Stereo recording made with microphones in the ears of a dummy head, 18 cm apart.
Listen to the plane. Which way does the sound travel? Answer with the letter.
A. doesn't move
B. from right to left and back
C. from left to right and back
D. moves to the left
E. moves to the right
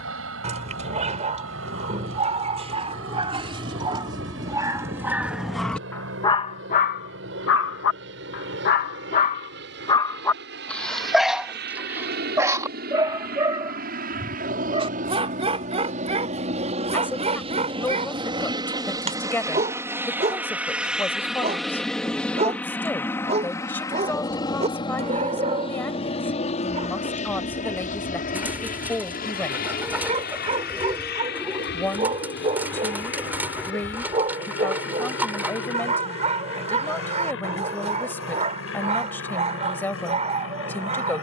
D.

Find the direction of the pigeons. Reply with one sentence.
In this clip you hear the pigeons in the centre.